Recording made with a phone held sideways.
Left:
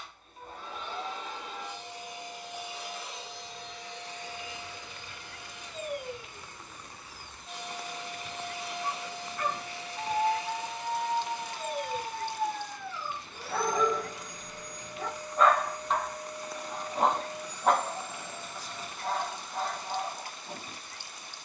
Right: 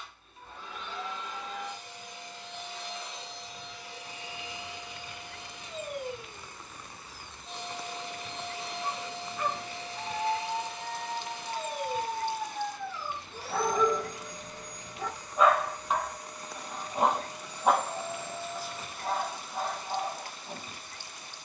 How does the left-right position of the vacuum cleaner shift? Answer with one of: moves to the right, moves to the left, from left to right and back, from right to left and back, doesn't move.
moves to the right.